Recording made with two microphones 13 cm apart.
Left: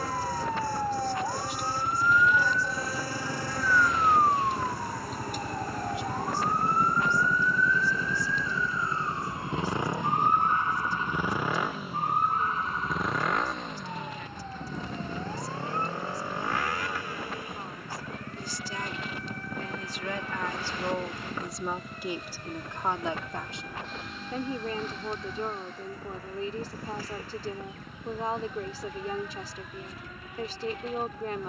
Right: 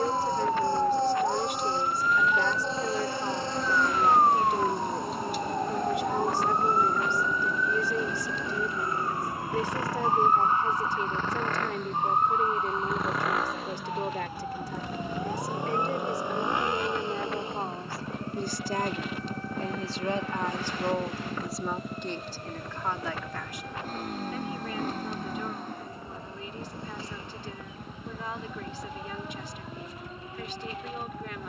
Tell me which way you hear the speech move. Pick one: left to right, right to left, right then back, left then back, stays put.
right to left.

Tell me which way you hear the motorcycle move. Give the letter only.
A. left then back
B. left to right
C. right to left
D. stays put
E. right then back
B.